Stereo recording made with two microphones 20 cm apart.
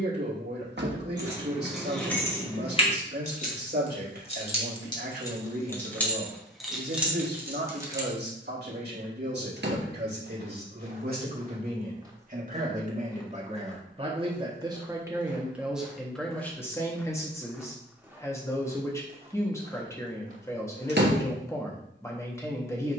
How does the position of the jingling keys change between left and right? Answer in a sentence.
In this clip you hear the jingling keys move from right to left and back again.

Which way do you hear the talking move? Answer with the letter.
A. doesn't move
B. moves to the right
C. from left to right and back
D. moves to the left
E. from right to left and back
D.